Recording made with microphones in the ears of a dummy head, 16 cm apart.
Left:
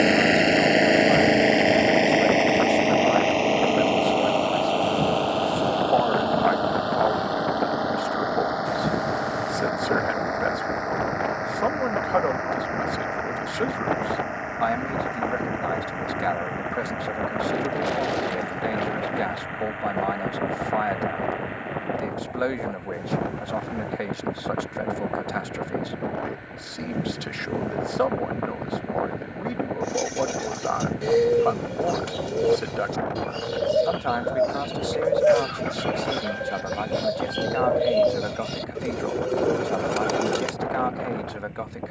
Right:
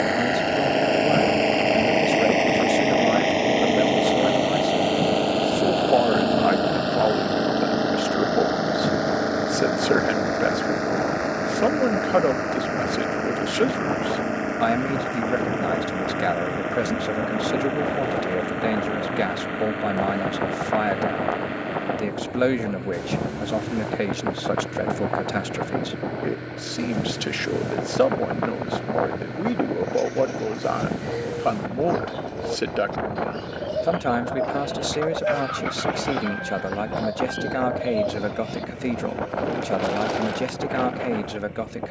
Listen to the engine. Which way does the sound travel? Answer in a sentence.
You can hear the engine go from the left side to the right.